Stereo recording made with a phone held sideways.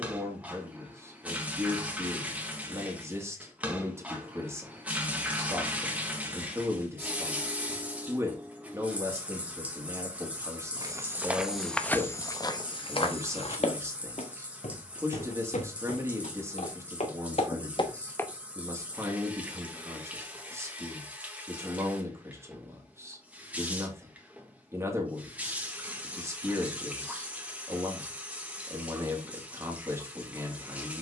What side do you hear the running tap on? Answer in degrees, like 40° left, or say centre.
10° right.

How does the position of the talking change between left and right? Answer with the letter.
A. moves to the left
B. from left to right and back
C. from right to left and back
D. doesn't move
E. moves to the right
D.